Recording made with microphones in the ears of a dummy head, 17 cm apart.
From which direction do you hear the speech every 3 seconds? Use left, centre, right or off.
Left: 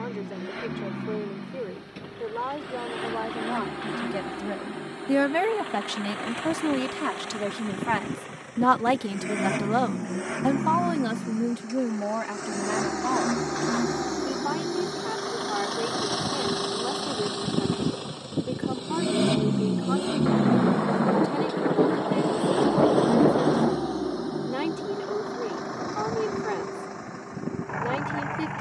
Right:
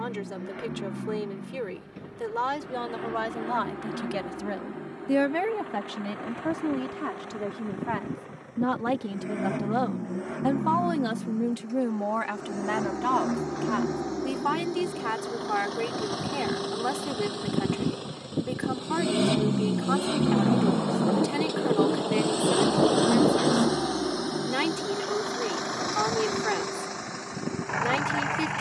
right, centre, left, centre, right, right, right, right, right, right.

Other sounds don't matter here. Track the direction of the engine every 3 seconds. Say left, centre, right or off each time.
left, left, left, left, left, left, centre, right, right, right.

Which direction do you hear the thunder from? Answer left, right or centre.
left.